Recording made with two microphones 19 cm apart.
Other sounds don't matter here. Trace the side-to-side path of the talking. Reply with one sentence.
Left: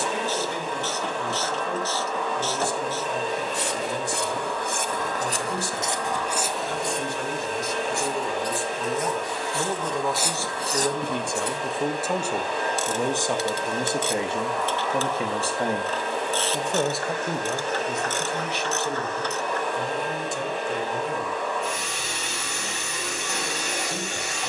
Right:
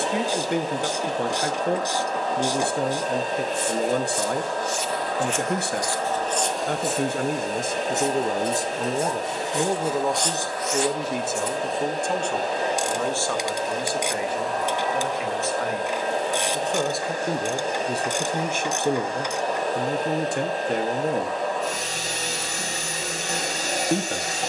In this clip you hear the talking move from right to left and back again.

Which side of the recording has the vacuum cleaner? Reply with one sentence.
In this clip you hear the vacuum cleaner on the right.